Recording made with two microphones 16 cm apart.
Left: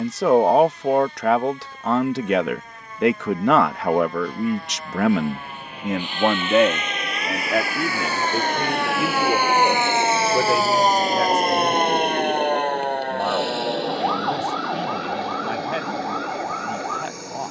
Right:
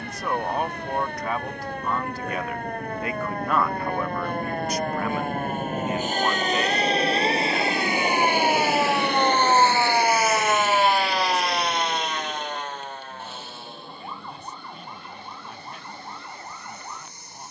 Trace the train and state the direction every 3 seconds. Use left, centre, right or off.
right, right, right, left, left, left.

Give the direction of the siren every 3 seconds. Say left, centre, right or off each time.
right, right, right, centre, left, left.